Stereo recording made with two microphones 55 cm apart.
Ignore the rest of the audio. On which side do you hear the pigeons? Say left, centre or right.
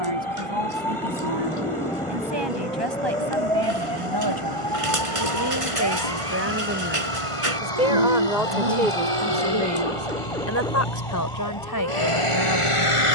right.